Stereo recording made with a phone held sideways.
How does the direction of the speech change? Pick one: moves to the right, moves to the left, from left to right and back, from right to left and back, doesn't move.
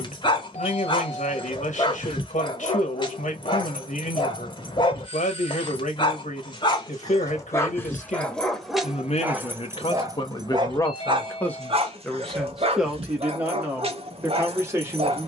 moves to the right.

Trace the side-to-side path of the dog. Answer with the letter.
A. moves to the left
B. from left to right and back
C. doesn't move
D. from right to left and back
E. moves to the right
E.